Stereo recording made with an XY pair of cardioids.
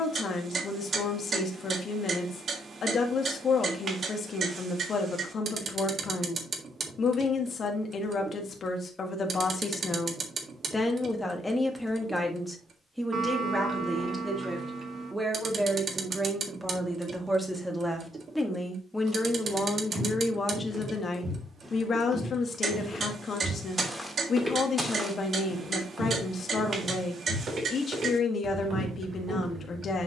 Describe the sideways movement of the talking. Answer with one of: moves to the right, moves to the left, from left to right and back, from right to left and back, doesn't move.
from left to right and back.